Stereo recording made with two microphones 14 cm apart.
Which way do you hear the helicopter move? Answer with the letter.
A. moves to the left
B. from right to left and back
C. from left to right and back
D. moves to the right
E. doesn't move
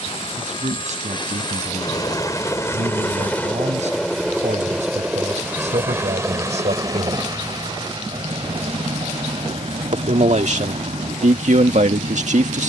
D.